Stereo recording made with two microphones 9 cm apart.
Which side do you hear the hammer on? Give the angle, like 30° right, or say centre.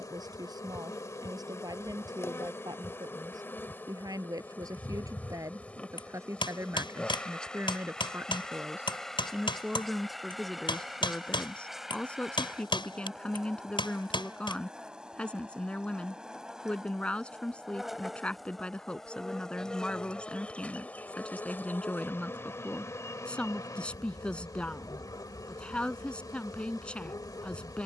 70° left.